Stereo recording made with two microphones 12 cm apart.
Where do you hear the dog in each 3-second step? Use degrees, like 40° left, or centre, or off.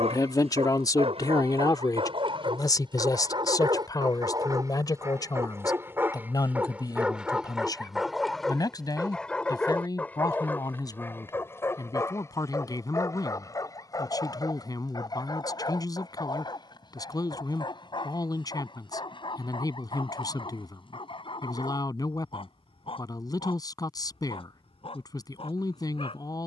50° right, 30° right, 10° right, 10° left, 30° left, 40° left, 40° left, 50° left, 50° left.